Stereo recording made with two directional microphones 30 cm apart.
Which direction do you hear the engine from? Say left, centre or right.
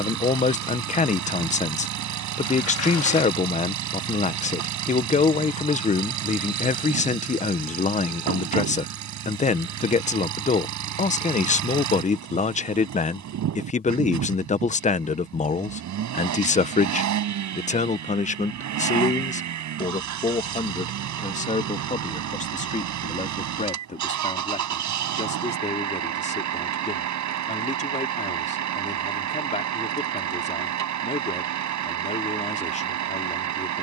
right.